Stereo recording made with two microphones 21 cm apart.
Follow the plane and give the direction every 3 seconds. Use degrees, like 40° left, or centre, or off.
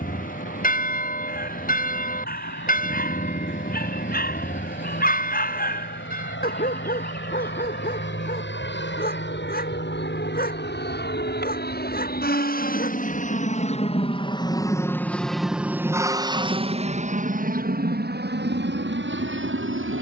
80° left, 70° left, 70° left, 60° left, 30° left, 20° right, 50° right.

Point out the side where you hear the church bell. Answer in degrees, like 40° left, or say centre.
40° left.